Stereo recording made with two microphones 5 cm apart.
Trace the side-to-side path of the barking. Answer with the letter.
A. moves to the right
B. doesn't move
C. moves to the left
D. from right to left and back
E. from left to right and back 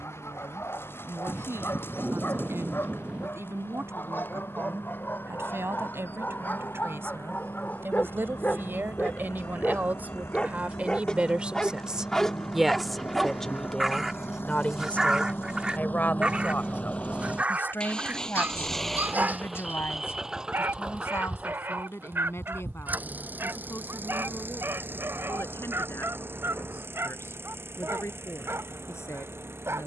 A.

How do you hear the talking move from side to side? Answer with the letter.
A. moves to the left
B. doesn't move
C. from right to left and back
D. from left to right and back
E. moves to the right
A.